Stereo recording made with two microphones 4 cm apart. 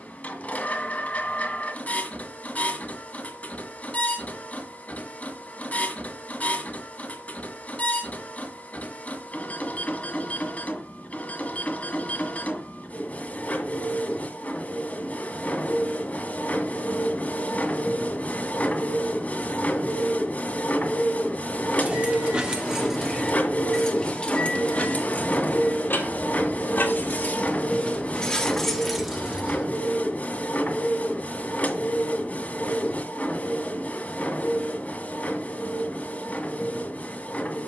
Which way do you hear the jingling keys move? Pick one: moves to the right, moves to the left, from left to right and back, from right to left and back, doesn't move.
from right to left and back.